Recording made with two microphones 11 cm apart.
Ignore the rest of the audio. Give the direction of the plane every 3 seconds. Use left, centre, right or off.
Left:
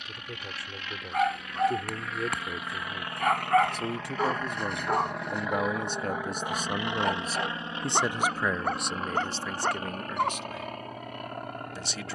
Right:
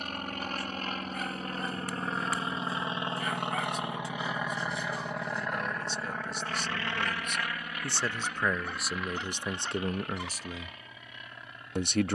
right, centre, left, left.